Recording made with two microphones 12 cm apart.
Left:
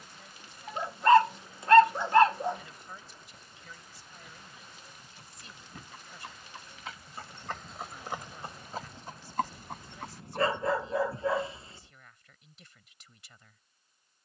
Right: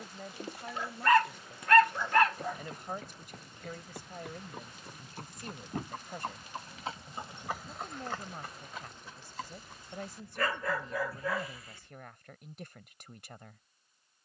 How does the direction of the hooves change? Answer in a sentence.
You can hear the hooves move to the left.